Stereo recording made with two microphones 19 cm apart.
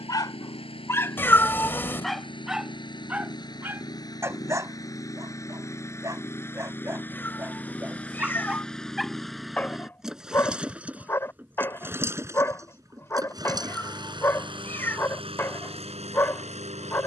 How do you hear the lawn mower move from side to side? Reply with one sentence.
You can hear the lawn mower travel towards the right.